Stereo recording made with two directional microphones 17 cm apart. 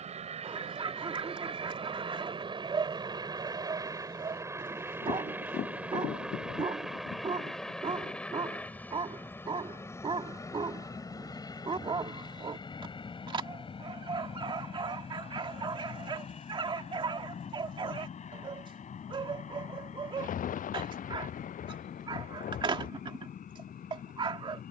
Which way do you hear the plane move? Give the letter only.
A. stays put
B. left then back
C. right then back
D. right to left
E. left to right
D.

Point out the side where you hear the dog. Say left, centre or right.
right.